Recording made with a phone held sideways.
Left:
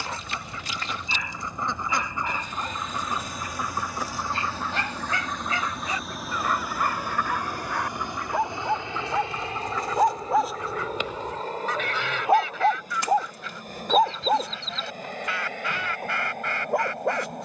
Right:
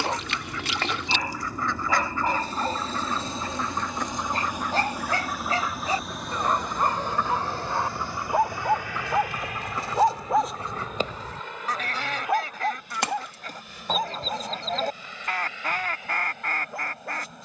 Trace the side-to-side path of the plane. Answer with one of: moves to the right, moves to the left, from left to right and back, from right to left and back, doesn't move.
moves to the left.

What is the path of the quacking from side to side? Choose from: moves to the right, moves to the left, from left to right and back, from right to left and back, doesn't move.
moves to the right.